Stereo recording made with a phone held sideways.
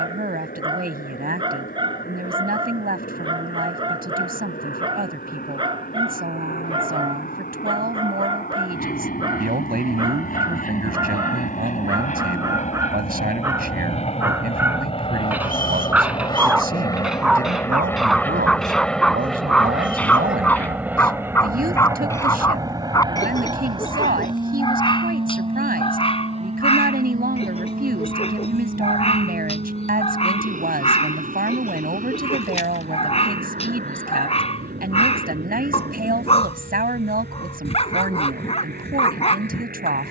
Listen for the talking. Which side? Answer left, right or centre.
right.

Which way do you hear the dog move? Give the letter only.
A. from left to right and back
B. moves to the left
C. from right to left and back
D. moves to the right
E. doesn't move
B.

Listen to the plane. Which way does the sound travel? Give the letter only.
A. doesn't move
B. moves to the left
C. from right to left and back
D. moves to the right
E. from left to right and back
D.